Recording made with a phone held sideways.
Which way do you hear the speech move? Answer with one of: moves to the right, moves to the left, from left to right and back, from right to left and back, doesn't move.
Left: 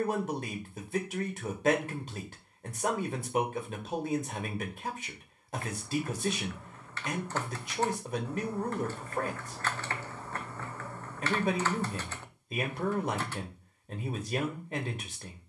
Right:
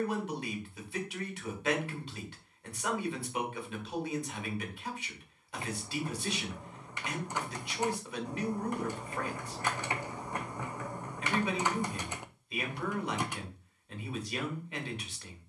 doesn't move.